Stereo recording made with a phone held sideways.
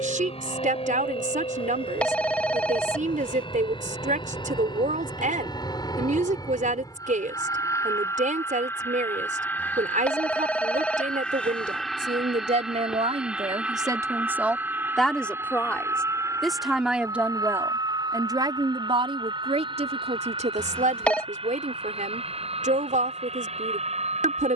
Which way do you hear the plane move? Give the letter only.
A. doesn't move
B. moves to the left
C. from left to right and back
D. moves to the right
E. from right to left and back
D.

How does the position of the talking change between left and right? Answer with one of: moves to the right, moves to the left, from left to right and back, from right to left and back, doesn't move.
from right to left and back.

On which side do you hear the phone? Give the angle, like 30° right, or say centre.
10° left.